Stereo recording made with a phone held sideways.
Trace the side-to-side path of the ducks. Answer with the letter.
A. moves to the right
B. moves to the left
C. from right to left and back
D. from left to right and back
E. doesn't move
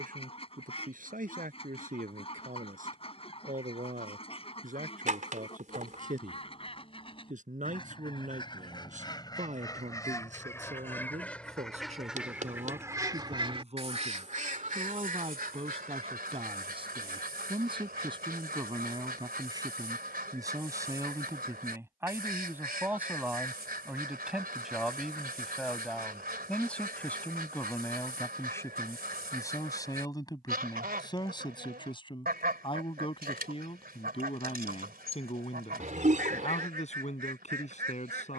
A.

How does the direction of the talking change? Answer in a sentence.
In this clip you hear the talking travel towards the left.